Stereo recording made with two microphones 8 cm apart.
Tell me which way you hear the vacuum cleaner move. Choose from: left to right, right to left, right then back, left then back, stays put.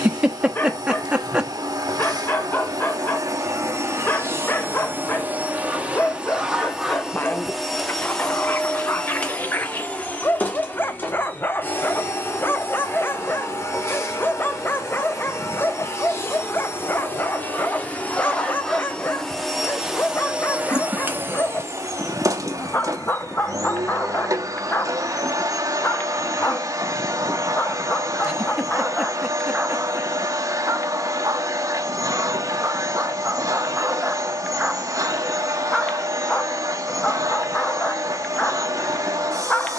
left then back.